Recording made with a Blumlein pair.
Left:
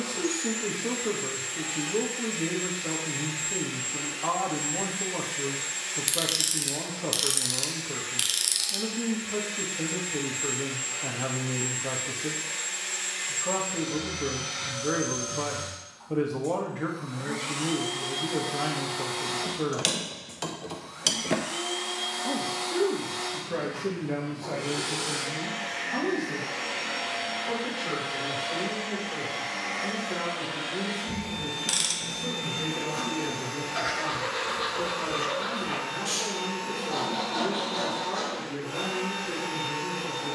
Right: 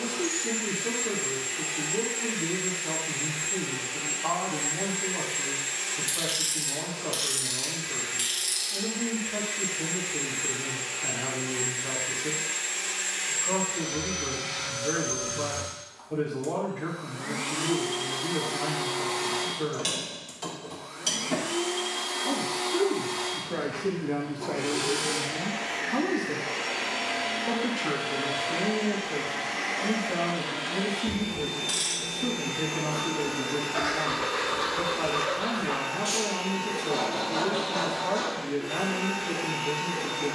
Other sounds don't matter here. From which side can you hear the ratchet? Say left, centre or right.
left.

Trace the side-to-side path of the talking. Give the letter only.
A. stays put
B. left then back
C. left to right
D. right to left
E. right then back
C.